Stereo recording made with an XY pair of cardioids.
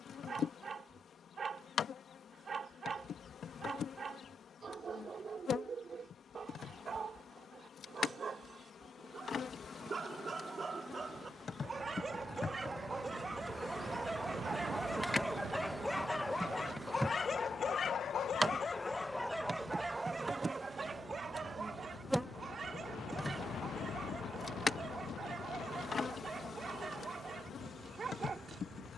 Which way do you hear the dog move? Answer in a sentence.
You can hear the dog go left and come back.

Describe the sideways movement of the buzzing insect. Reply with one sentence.
You can hear the buzzing insect go right and come back.